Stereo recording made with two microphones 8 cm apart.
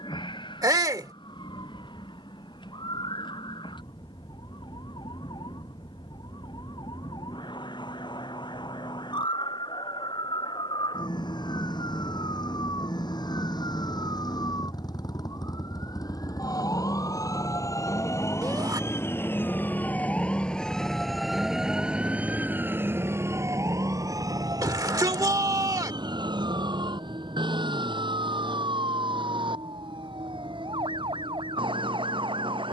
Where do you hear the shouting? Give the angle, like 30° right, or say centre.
50° right.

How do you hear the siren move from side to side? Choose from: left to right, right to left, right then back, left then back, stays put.
left to right.